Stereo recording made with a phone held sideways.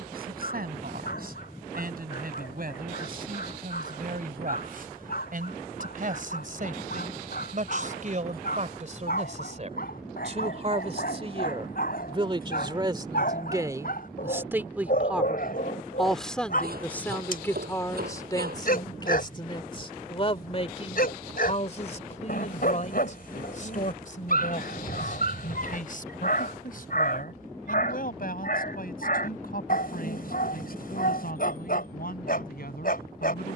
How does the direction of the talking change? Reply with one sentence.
In this clip you hear the talking move from right to left.